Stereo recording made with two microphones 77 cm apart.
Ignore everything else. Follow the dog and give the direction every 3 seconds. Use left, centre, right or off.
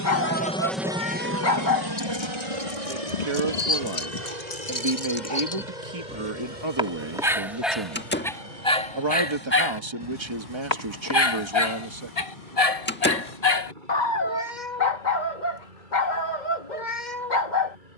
left, left, centre, left, left, left.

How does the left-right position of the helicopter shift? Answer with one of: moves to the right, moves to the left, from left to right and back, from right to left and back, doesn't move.
moves to the right.